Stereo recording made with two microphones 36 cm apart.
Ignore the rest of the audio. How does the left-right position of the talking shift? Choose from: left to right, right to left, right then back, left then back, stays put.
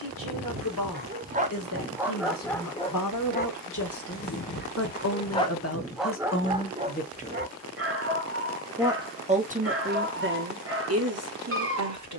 left to right.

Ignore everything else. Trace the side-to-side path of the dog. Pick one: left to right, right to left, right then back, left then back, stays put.
left then back.